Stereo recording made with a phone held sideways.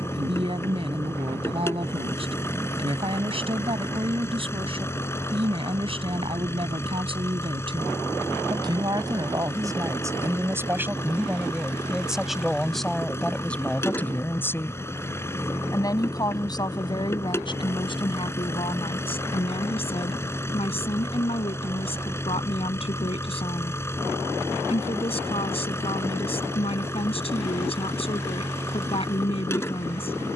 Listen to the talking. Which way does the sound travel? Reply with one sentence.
In this clip you hear the talking move from right to left.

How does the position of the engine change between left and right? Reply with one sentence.
In this clip you hear the engine stay put.